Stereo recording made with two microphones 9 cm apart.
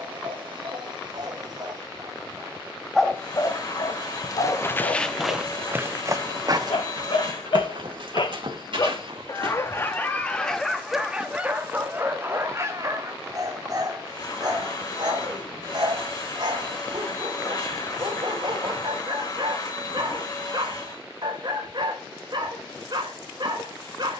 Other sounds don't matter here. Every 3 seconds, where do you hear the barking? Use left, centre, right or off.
right, left, left, centre, right, right, right, right.